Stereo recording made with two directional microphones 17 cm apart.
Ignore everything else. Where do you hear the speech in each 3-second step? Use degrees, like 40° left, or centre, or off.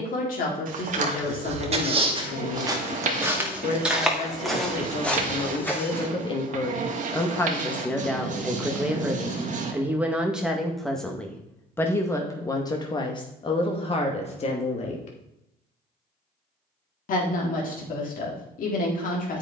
60° left, 40° left, 10° left, centre, 30° left, 50° left, 50° left.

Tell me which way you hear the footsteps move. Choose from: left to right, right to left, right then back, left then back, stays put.
right to left.